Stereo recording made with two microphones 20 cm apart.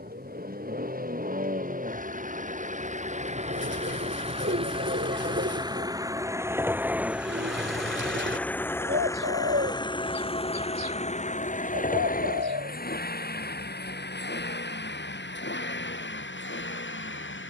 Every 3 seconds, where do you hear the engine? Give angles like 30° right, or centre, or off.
40° right, 30° right, centre, 30° left, 50° left, 70° left.